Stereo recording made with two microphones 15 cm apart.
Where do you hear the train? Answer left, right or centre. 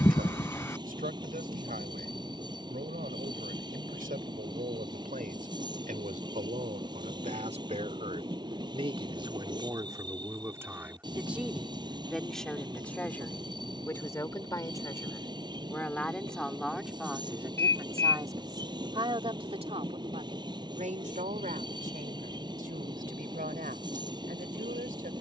right.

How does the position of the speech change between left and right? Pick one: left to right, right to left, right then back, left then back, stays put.
left then back.